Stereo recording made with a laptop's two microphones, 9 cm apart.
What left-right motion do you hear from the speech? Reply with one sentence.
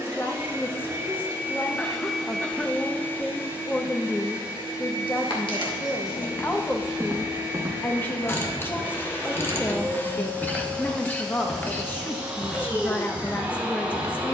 In this clip you hear the speech stay put.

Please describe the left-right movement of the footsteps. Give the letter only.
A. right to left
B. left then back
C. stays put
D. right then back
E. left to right
D.